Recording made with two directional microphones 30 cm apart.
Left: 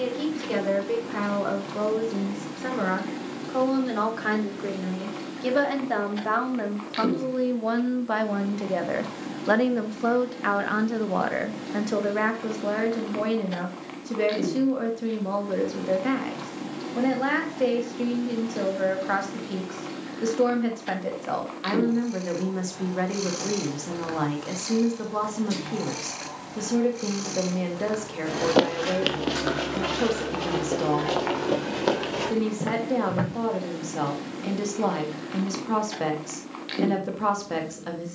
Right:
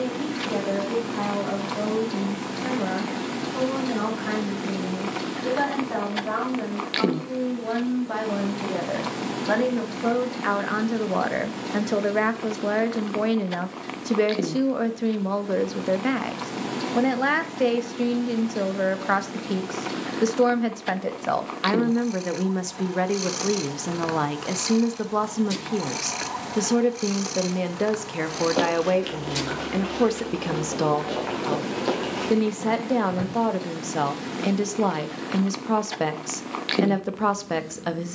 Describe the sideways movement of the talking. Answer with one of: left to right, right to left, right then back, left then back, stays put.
left to right.